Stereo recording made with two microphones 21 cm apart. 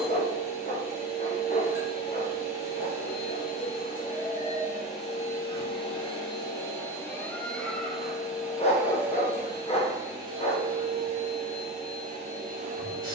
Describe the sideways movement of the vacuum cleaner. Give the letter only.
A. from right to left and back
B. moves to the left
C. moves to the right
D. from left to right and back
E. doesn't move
C.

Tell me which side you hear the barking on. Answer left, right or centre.
left.